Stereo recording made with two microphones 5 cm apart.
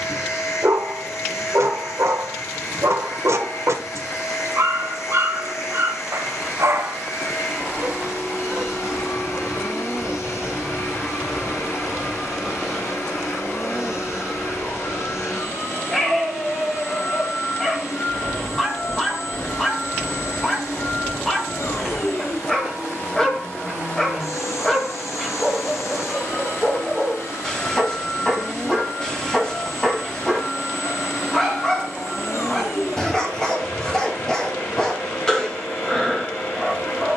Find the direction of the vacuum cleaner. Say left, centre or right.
left.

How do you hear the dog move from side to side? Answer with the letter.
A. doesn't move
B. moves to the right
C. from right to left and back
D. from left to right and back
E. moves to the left
E.